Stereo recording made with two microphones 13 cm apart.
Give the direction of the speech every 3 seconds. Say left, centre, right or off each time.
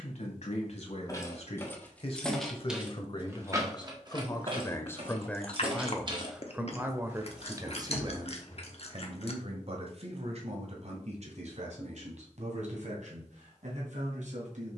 left, left, right, right, right.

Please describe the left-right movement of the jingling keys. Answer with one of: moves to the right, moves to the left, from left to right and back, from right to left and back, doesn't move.
from left to right and back.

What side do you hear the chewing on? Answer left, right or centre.
left.